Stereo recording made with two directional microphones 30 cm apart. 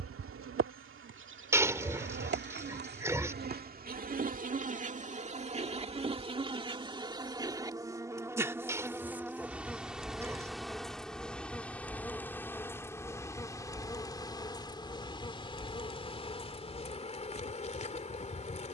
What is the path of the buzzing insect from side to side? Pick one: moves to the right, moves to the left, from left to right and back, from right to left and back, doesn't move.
moves to the left.